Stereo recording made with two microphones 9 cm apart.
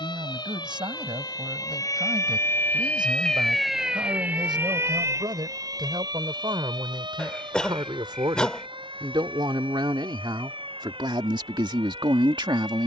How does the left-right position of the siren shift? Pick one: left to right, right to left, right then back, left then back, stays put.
left to right.